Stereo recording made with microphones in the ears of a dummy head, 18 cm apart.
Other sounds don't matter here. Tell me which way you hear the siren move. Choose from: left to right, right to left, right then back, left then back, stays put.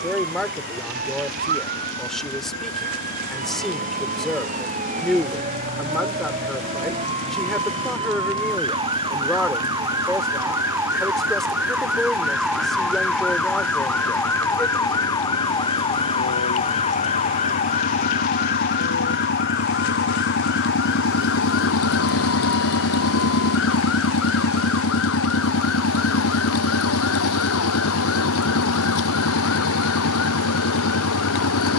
right to left.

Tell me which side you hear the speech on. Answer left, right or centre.
centre.